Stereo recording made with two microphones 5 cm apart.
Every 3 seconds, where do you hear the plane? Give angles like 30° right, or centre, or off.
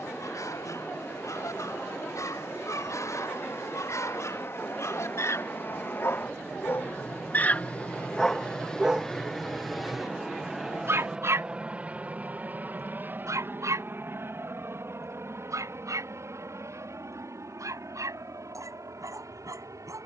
60° left, 50° left, 30° left, 10° right, 40° right, 50° right, 60° right.